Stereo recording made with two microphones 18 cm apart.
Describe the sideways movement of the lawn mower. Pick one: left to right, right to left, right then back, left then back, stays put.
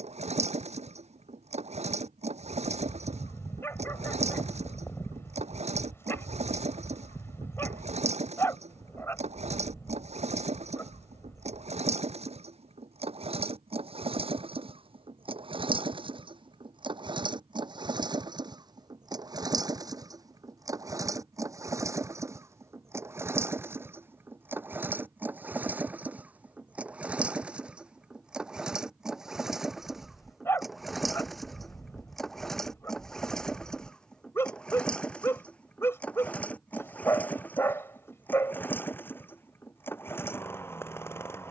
right to left.